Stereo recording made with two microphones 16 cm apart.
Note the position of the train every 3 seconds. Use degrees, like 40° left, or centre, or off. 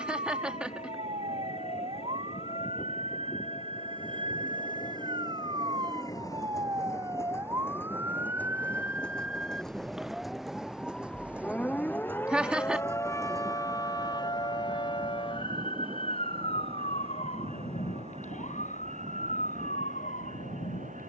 40° left, 30° left, 20° left, centre, 20° right, 40° right, 50° right.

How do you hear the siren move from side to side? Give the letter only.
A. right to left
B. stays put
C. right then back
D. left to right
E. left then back
A.